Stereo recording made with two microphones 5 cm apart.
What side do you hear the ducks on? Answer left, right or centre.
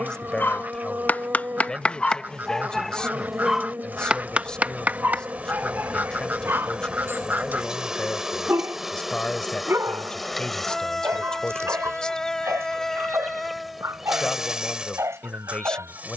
right.